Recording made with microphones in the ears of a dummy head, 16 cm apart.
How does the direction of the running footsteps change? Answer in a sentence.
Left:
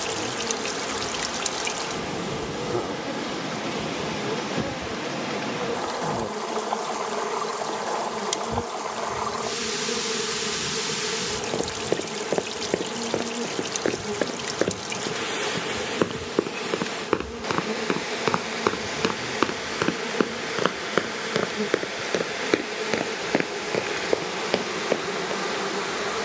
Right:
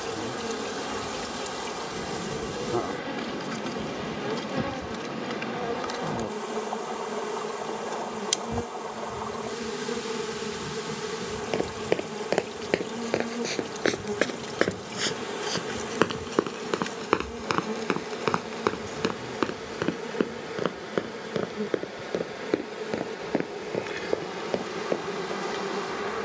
In this clip you hear the running footsteps go from the right side to the left.